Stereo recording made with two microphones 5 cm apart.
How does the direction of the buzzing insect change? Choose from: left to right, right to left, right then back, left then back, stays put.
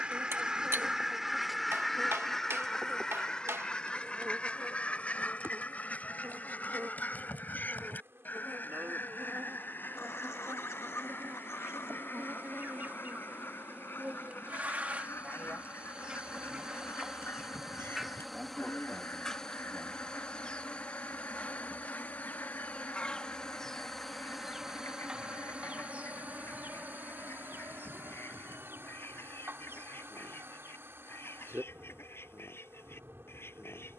left then back.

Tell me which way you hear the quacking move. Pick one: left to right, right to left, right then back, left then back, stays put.
right to left.